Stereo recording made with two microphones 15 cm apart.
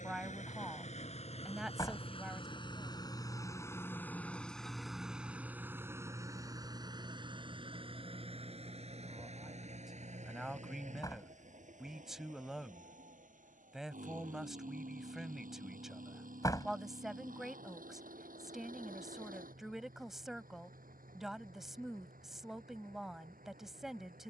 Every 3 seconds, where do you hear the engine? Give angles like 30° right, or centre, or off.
40° left, centre, 30° right, 50° right, 60° right, 70° right, 70° right, 70° right.